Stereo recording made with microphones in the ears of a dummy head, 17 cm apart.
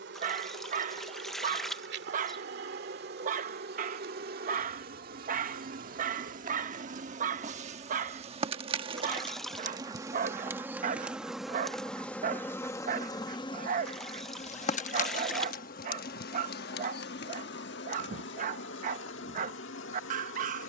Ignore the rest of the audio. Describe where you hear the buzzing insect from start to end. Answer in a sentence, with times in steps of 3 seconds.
In this clip you hear the buzzing insect on the right from 0 s, in the centre from 9 s and on the left from 12 s.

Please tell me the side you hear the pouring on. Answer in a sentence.
You can hear the pouring in the centre.